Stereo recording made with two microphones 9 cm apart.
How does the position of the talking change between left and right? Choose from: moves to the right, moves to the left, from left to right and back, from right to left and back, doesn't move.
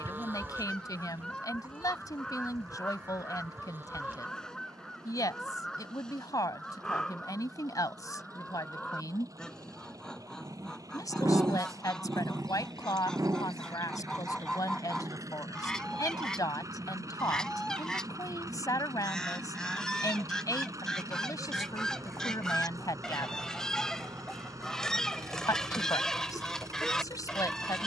doesn't move.